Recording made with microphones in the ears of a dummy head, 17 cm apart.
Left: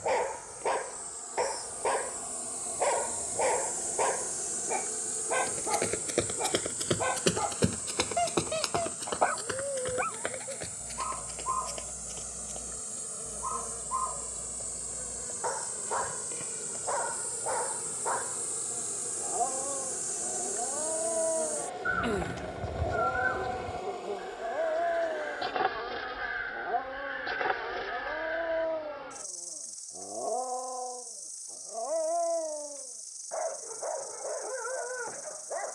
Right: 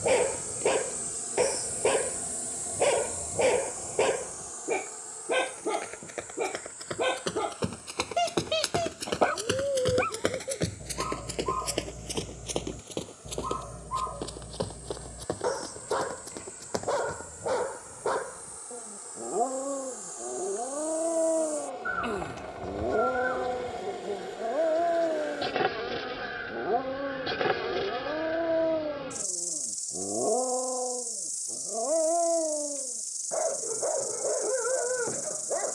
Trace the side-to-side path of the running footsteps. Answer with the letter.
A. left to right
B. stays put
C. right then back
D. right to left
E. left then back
A.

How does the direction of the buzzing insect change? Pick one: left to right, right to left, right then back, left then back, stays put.
left then back.